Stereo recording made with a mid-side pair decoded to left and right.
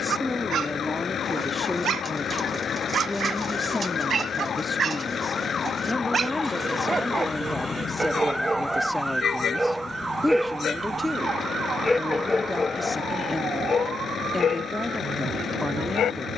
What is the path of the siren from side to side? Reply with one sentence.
You can hear the siren move from left to right.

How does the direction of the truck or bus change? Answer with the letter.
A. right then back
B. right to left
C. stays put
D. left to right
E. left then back
C.